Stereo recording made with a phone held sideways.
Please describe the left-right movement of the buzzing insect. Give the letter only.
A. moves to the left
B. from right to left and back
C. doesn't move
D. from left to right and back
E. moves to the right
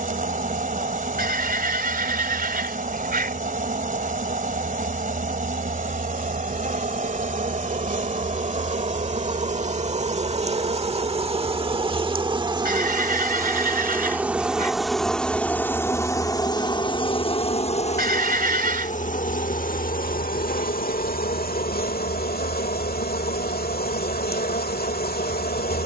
A.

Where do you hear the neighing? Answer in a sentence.
You can hear the neighing on the right.